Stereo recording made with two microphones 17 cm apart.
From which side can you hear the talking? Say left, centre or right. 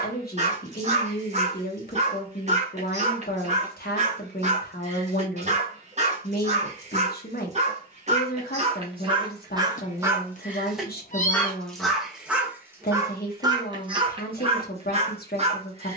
left.